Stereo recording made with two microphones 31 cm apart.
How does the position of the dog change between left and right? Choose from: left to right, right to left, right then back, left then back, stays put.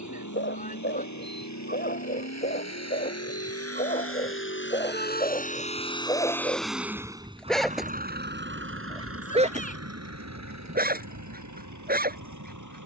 left to right.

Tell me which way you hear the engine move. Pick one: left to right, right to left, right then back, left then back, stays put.
left to right.